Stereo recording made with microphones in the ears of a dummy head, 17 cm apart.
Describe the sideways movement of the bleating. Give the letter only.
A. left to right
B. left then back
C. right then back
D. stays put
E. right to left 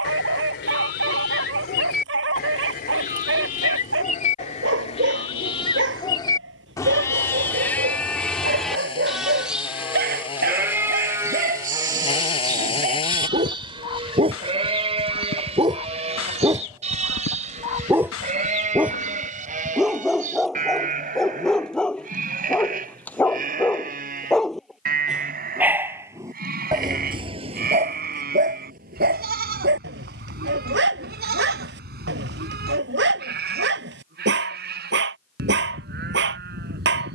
A.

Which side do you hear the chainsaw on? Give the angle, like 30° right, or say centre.
30° left.